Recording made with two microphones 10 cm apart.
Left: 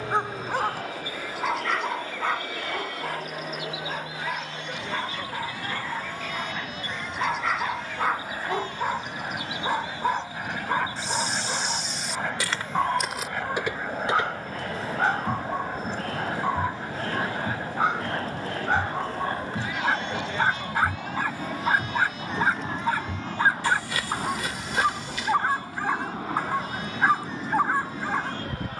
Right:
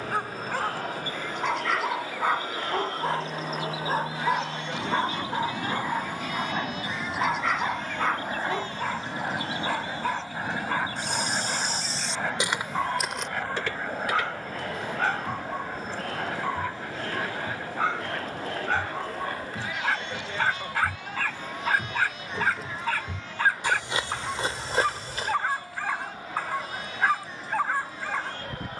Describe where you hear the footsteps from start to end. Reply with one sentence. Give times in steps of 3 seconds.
You can hear the footsteps not at all from 0 s, on the right from 9 s, in the centre from 12 s, on the left from 15 s, in the centre from 21 s, on the right from 24 s and not at all from 27 s.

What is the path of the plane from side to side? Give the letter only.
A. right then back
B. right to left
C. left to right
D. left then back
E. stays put
B.